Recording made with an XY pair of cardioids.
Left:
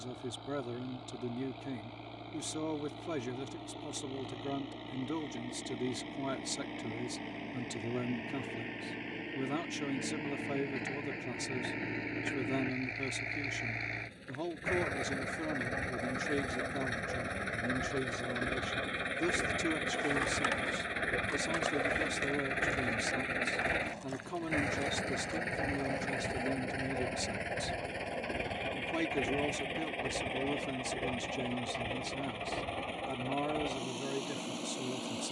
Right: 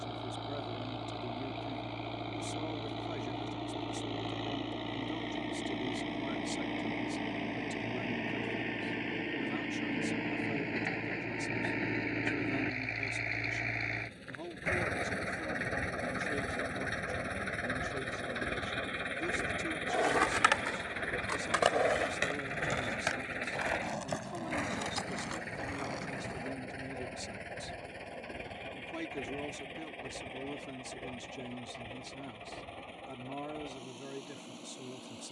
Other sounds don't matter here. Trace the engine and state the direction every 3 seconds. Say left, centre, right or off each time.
right, right, right, right, right, centre, centre, left, left, left, left, left.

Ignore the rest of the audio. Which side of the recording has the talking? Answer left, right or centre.
left.